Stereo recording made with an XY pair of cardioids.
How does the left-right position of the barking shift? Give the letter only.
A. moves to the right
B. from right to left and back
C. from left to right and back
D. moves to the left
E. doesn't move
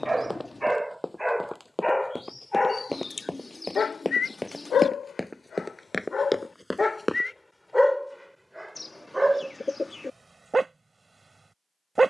B.